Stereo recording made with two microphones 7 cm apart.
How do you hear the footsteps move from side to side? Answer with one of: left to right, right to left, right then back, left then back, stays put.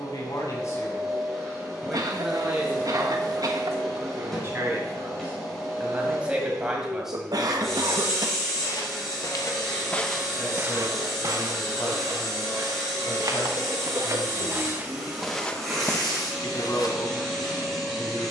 right then back.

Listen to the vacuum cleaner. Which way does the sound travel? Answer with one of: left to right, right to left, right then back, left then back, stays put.
stays put.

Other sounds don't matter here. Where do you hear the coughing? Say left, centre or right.
right.